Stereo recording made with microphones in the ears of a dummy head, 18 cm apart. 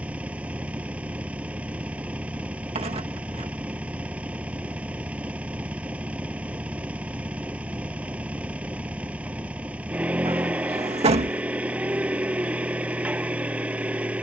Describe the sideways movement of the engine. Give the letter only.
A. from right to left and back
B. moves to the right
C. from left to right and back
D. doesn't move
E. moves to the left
D.